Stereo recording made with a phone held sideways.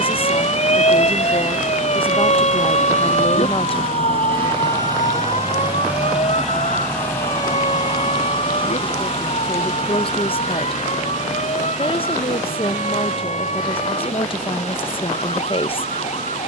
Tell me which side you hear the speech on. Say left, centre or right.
left.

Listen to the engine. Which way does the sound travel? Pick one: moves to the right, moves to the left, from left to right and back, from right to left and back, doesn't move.
moves to the left.